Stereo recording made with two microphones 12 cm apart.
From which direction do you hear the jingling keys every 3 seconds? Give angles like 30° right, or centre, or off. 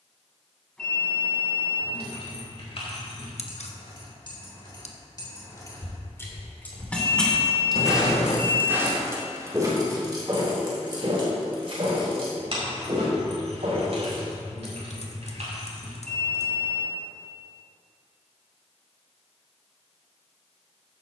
60° left, 40° left, centre, 40° right, 60° right, 70° right, off.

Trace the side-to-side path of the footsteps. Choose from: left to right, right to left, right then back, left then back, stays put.
left to right.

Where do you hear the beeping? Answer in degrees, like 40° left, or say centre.
10° left.